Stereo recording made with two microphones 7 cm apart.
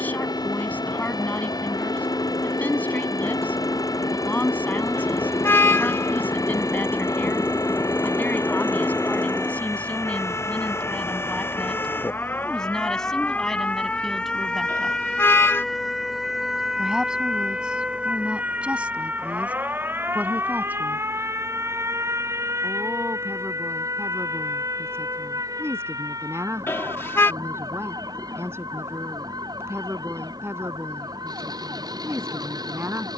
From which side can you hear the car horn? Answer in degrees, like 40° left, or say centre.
30° left.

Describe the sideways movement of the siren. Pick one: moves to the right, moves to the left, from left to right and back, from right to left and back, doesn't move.
moves to the right.